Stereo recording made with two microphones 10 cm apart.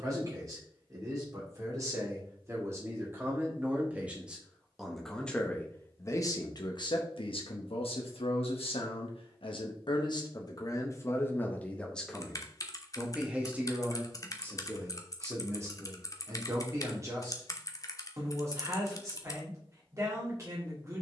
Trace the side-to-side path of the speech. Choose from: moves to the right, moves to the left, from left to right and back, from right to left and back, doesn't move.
from right to left and back.